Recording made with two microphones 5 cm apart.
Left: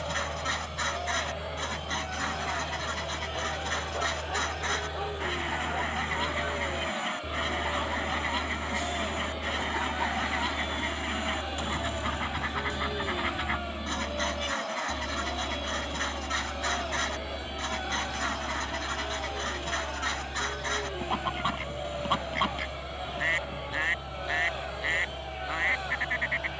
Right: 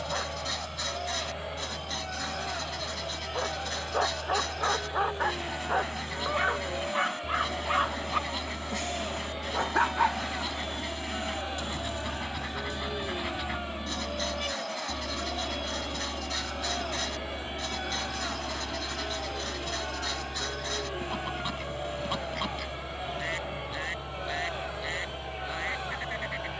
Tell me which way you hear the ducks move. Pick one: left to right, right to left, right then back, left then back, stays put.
stays put.